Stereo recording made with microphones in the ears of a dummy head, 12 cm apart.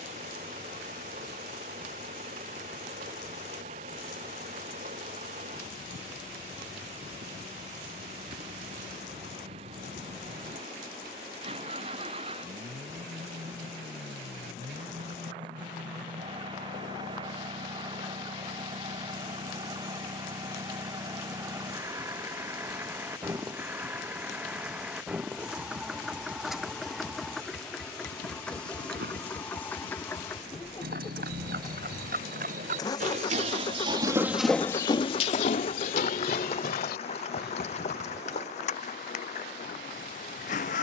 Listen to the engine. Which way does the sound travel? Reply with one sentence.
In this clip you hear the engine move from right to left.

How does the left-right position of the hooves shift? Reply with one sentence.
In this clip you hear the hooves move to the left.